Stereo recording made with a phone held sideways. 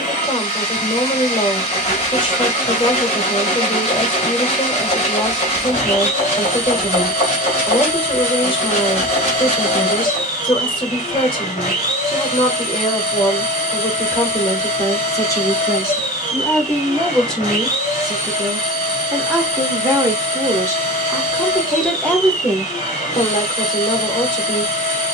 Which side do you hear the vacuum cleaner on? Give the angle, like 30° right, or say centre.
50° left.